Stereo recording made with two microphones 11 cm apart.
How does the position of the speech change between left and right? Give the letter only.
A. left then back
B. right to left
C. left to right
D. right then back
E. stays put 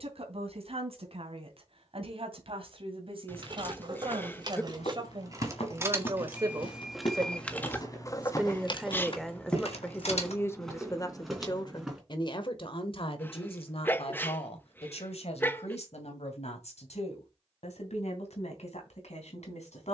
B.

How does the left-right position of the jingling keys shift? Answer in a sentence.
In this clip you hear the jingling keys travel towards the left.